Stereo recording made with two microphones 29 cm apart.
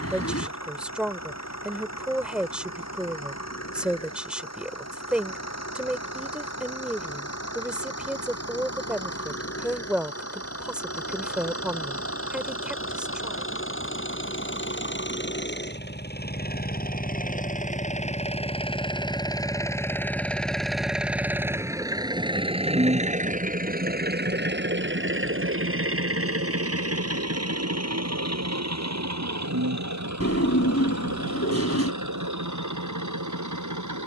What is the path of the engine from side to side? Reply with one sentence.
In this clip you hear the engine move to the right.